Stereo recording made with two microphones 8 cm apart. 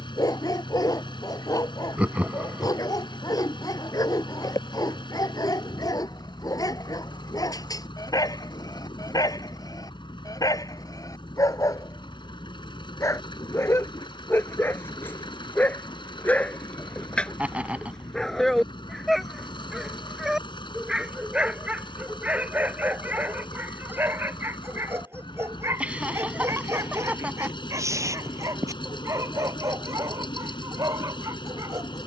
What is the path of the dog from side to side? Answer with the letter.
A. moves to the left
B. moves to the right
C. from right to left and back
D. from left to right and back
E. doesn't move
B.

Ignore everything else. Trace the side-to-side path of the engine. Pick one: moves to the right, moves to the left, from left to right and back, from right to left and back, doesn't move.
doesn't move.